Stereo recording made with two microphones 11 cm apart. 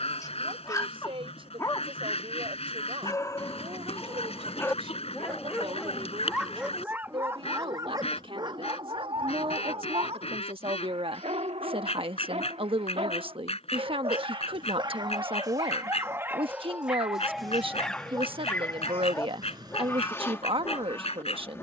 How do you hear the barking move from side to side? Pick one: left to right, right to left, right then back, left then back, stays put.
right then back.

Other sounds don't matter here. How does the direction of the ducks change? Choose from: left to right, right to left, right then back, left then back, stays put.
stays put.